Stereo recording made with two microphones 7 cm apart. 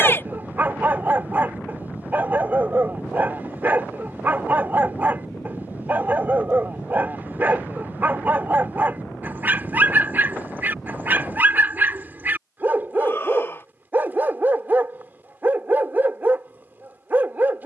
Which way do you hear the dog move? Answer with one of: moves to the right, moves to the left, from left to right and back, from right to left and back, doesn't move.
doesn't move.